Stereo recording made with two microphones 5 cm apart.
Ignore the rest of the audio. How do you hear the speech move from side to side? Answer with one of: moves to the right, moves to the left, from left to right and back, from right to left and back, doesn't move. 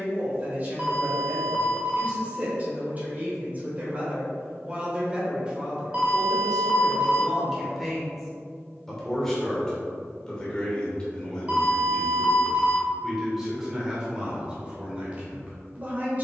from right to left and back.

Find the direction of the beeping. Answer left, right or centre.
right.